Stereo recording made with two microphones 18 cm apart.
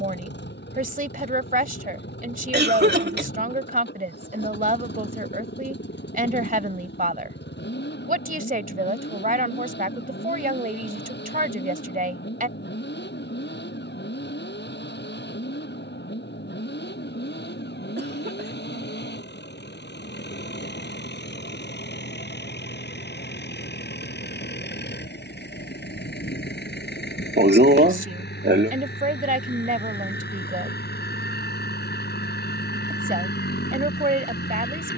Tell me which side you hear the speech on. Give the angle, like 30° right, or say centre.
50° right.